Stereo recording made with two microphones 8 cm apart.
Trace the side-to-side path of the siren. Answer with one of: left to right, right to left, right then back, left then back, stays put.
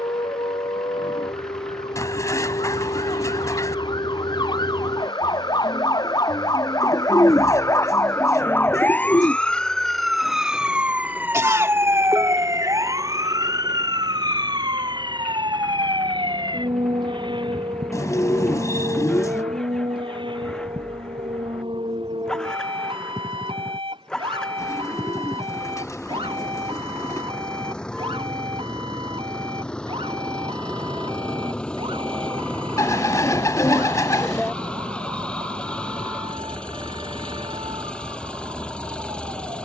left to right.